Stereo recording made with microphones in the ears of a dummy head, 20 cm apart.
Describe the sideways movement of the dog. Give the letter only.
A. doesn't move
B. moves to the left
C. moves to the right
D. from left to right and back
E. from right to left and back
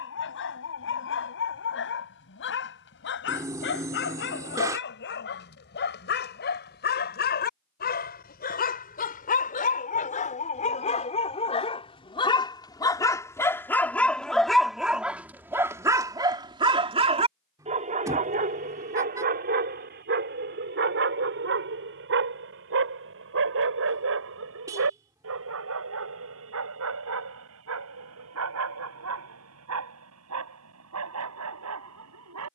C.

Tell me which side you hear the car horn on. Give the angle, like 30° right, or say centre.
10° right.